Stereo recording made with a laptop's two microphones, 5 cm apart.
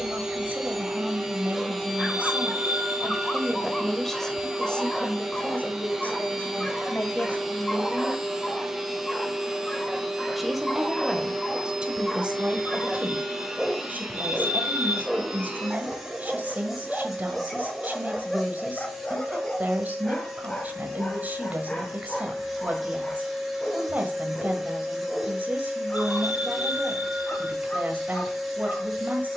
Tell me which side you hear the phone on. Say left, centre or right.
right.